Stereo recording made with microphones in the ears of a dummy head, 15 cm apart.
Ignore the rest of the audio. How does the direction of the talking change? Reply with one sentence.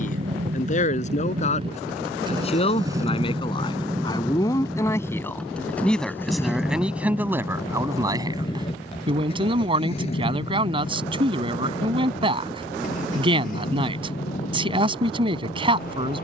You can hear the talking move to the right.